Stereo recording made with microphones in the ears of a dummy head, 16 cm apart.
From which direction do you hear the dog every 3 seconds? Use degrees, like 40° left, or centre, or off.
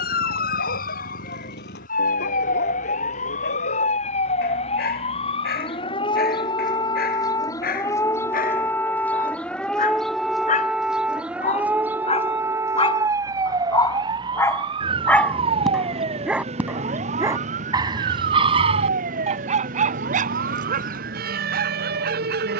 60° left, 60° left, 50° left, 40° left, 20° left, 10° right, 40° right, 60° right.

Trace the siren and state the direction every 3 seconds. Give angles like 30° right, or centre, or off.
50° left, 30° left, 20° left, centre, 20° right, 30° right, 40° right, 50° right.